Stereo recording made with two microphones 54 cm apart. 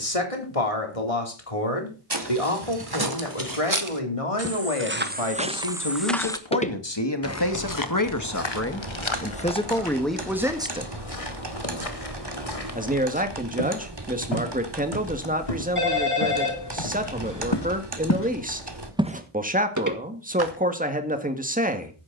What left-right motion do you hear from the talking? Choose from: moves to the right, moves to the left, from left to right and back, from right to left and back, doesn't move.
moves to the right.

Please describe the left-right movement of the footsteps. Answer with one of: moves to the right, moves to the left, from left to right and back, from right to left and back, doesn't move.
from right to left and back.